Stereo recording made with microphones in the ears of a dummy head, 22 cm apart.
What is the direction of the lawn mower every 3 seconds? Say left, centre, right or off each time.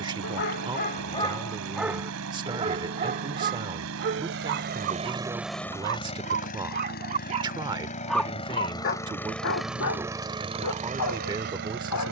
right, right, left, right.